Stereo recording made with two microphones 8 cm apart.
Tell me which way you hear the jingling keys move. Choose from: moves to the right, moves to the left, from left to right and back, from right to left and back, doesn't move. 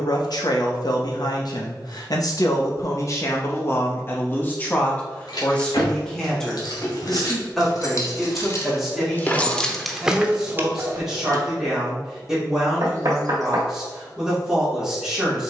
moves to the right.